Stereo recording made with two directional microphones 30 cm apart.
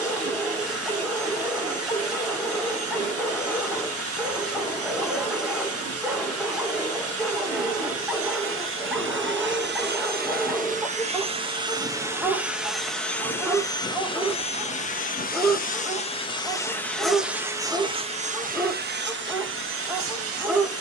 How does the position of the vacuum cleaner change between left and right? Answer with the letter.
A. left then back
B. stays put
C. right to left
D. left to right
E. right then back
A.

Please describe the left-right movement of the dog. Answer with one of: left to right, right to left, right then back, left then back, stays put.
stays put.